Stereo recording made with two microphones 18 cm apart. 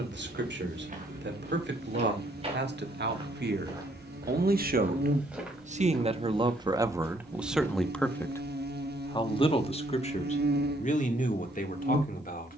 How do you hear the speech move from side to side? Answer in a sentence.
You can hear the speech go from the right side to the left.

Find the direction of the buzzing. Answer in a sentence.
You can hear the buzzing on the right.